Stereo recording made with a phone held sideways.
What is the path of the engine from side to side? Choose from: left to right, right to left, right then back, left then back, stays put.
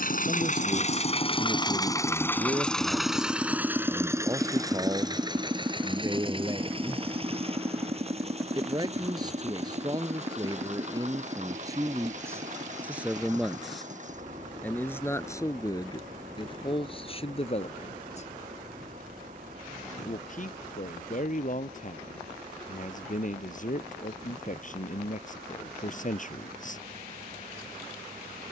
left to right.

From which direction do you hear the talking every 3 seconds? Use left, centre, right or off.
right, right, right, right, centre, left, left, left, left, off.